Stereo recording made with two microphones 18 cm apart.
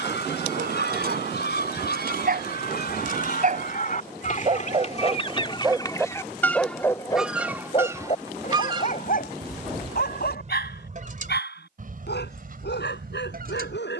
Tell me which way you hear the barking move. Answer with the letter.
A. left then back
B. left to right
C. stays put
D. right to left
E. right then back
D.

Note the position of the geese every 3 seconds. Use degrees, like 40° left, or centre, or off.
70° left, 40° left, 10° right, 40° right, 50° right.